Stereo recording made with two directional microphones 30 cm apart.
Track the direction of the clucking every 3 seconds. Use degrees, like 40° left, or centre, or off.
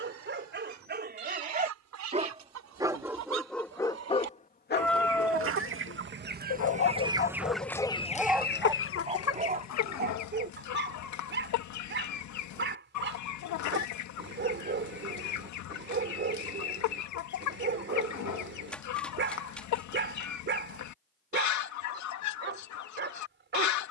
70° right, 50° right, centre, 70° left, 70° left, 70° left, 70° left, 70° left.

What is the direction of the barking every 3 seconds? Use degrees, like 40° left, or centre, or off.
30° right, 20° left, 20° left, 30° right, 40° right, 40° right, 40° right, 40° right.